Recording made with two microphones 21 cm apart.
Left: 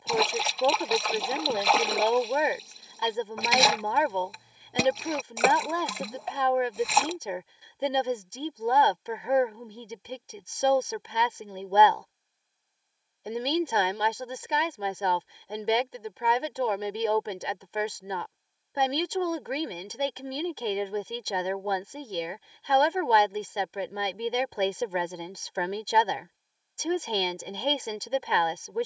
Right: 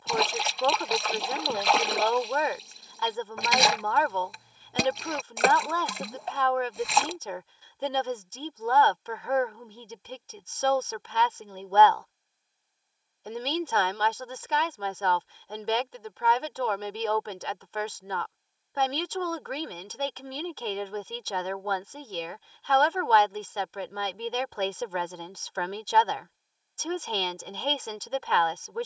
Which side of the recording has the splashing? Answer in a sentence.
You can hear the splashing in the centre.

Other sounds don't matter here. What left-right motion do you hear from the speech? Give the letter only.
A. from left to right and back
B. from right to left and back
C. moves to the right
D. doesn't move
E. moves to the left
D.